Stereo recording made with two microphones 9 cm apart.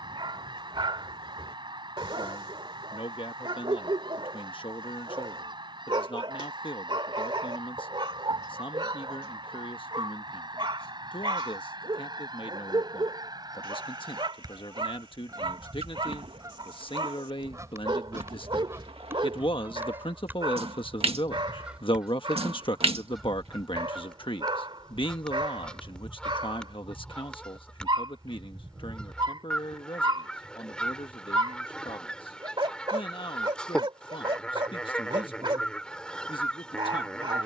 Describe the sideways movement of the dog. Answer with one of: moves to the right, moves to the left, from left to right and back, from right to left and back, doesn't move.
doesn't move.